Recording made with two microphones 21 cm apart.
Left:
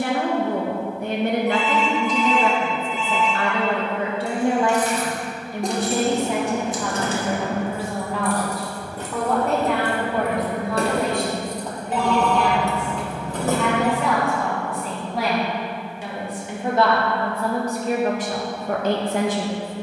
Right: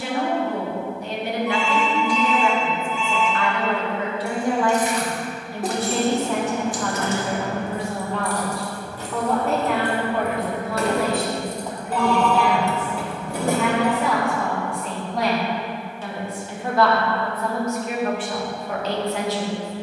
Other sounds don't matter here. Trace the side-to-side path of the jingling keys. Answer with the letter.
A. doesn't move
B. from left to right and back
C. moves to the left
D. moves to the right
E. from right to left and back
E.